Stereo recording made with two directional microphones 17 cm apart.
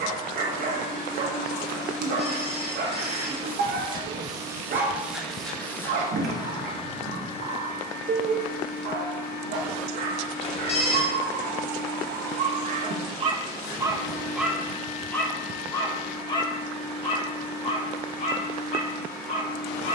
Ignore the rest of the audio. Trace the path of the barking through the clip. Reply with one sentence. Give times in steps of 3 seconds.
You can hear the barking on the right from 0 s and on the left from 15 s.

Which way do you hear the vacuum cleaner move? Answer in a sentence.
In this clip you hear the vacuum cleaner move to the left.